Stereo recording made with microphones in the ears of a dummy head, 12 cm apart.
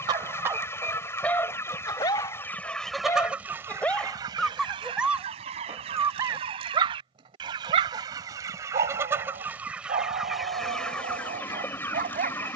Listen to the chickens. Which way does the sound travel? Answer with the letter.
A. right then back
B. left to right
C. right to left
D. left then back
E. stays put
A.